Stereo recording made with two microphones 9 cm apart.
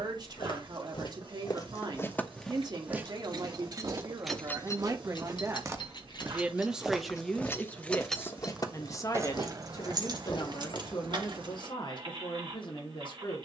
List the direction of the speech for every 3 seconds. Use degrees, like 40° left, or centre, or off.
50° right, 50° right, 10° left, 50° left, 70° left.